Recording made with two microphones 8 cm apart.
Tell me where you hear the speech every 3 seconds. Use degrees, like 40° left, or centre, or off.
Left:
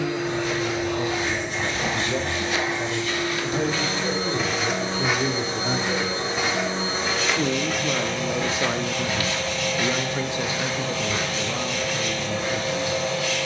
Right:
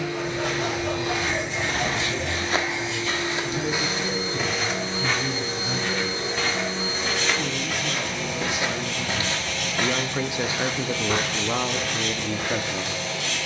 80° left, 70° left, 40° left, 20° right, 50° right.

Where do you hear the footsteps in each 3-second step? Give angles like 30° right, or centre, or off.
50° right, centre, centre, 40° right, 70° right.